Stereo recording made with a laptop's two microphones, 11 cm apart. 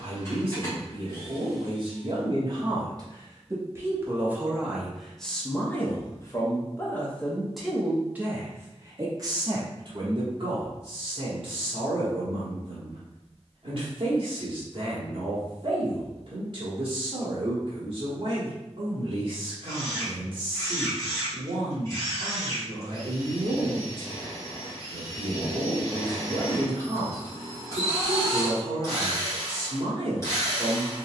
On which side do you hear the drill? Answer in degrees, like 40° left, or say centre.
30° left.